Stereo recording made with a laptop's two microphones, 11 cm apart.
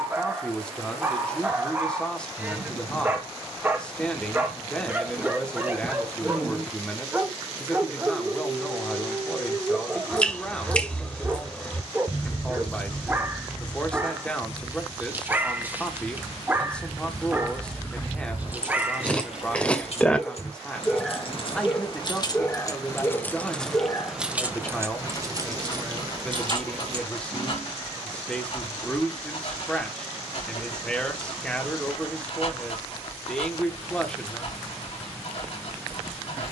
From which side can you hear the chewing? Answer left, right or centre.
centre.